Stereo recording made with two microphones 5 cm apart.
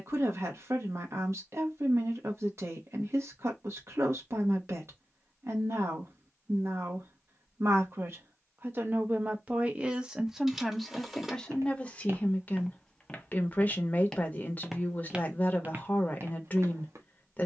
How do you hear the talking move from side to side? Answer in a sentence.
You can hear the talking move to the left.